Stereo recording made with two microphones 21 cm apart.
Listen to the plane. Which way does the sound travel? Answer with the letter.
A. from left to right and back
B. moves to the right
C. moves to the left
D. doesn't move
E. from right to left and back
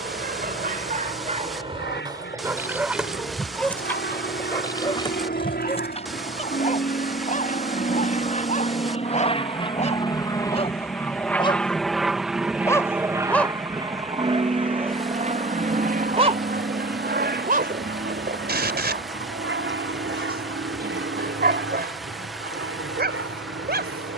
B.